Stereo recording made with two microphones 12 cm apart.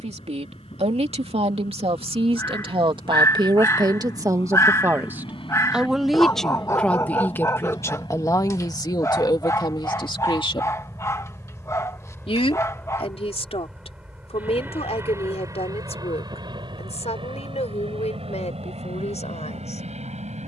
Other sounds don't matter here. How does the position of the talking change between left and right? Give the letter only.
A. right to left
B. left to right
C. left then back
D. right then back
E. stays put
A.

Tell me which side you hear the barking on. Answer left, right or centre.
left.